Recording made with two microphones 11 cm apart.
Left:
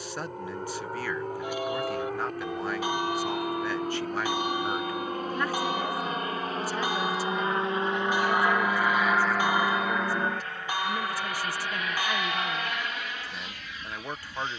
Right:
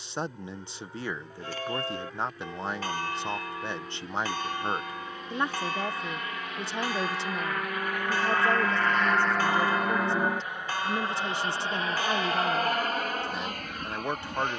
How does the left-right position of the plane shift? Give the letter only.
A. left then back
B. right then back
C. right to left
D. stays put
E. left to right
E.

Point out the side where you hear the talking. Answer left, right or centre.
right.